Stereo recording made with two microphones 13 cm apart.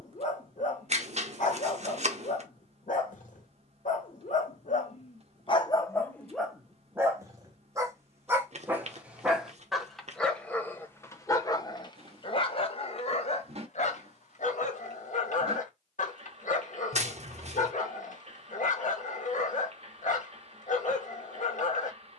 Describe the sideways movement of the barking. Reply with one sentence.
You can hear the barking go right and come back.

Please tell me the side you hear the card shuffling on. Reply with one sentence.
In this clip you hear the card shuffling on the right.